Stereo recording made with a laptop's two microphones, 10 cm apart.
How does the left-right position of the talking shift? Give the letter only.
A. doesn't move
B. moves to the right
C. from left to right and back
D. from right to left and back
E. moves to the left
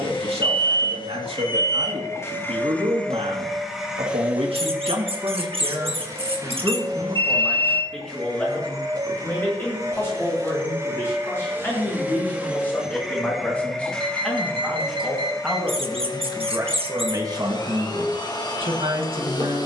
D.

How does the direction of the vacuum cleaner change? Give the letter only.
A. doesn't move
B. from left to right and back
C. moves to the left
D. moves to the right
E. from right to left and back
B.